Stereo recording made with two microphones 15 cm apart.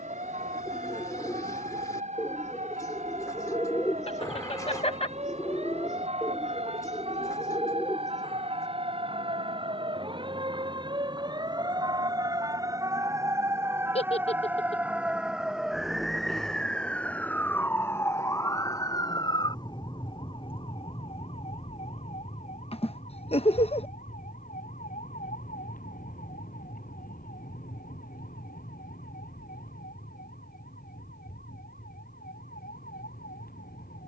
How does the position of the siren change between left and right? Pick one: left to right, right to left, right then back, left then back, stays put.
right to left.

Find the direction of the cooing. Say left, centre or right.
left.